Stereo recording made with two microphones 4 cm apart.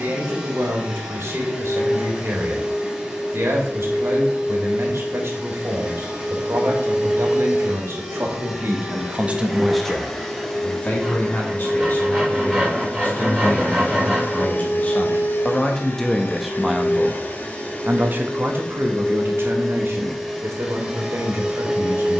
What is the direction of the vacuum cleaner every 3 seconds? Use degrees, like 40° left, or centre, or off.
10° right, 10° right, 10° right, 10° left, 40° left, 50° left, 10° left, 10° right.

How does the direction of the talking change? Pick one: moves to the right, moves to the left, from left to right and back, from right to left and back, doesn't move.
from right to left and back.